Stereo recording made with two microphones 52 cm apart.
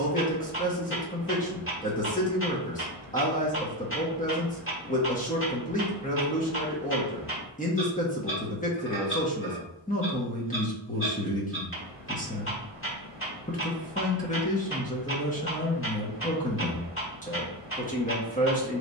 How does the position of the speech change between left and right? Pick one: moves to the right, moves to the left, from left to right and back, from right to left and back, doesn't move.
doesn't move.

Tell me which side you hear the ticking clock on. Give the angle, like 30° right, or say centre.
20° left.